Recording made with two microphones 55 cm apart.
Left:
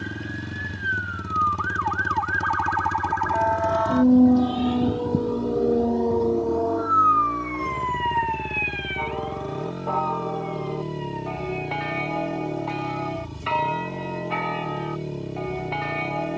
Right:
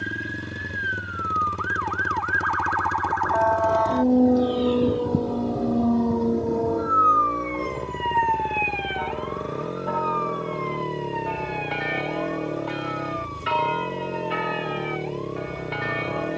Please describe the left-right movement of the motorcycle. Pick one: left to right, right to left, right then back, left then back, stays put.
stays put.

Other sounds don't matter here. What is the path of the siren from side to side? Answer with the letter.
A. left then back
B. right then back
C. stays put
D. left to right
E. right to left
D.